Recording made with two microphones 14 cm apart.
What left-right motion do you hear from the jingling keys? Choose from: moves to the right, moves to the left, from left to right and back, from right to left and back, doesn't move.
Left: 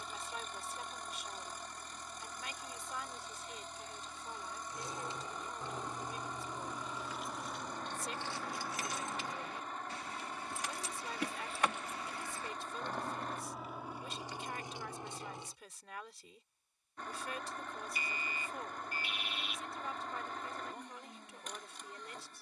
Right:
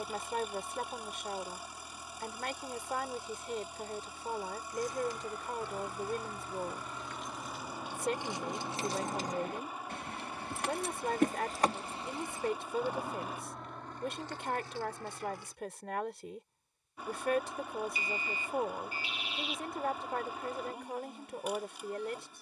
from left to right and back.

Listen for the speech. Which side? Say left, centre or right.
right.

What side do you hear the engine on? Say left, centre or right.
centre.